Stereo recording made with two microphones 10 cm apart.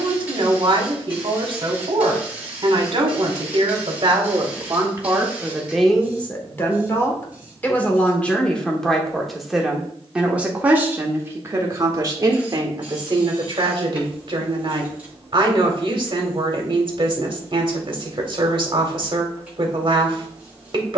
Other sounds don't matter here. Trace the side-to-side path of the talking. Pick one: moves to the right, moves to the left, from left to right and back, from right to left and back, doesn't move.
from right to left and back.